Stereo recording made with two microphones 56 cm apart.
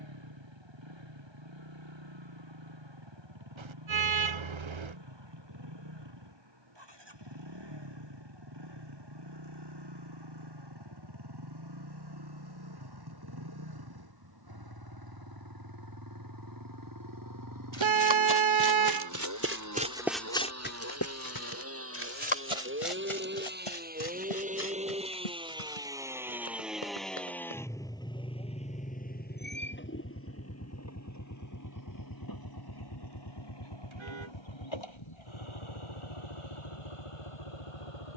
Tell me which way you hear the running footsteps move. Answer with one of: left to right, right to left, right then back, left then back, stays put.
right to left.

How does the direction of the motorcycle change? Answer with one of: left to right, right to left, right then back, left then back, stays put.
right to left.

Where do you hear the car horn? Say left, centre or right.
right.